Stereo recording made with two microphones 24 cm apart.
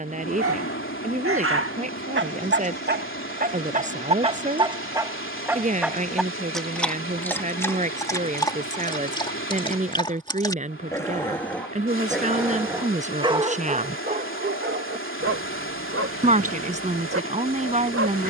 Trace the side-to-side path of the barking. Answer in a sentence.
You can hear the barking move from right to left and back again.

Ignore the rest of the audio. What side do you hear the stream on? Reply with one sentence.
You can hear the stream on the left.